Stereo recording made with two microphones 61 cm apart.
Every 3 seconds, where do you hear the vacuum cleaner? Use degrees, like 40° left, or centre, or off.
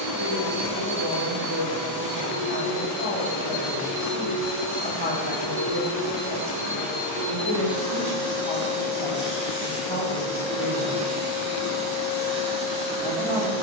70° right, 50° right, 10° right, centre, 50° right.